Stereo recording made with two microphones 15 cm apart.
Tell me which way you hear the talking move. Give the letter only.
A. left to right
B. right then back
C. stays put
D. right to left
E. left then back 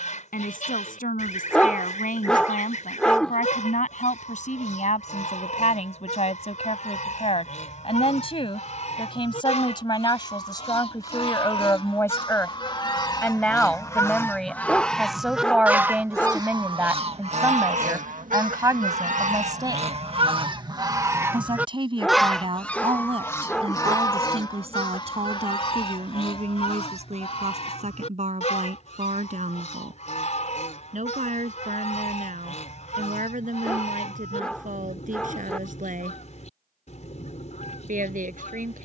A.